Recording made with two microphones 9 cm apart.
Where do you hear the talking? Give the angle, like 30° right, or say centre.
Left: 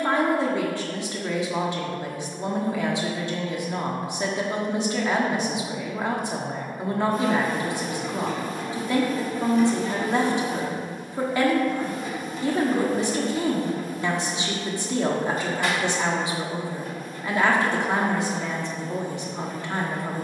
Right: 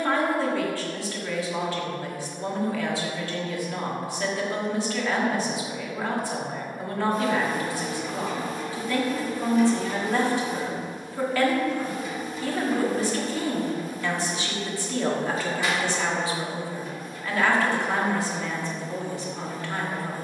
20° left.